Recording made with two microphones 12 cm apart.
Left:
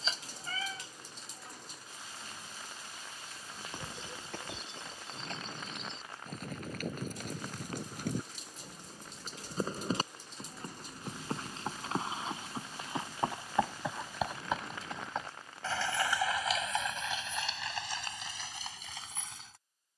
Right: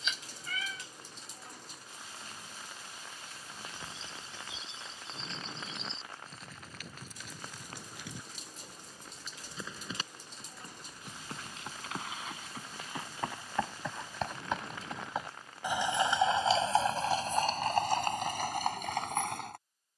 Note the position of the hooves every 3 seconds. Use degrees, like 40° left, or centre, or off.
off, 60° left, 50° left, 40° left, 20° left, 30° right, 60° right.